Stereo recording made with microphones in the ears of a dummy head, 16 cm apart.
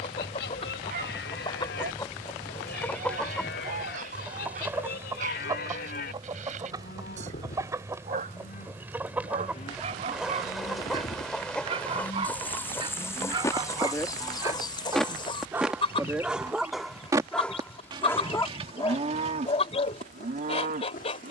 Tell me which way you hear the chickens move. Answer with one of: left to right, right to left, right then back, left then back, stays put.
right then back.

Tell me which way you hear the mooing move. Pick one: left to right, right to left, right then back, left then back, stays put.
left to right.